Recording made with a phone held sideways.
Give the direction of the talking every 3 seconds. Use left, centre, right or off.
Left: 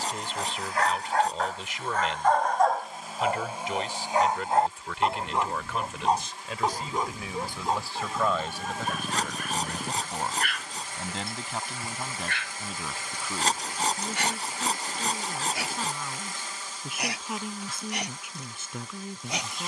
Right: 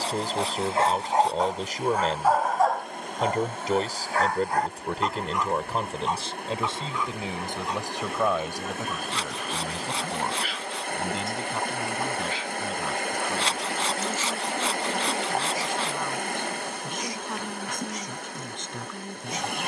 right, right, right, centre, centre, centre, centre.